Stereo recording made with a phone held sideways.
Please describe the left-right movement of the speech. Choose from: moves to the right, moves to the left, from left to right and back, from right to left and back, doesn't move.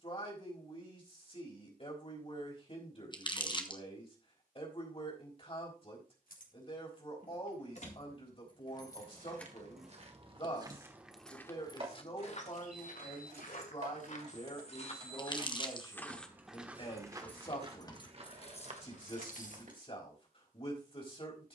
doesn't move.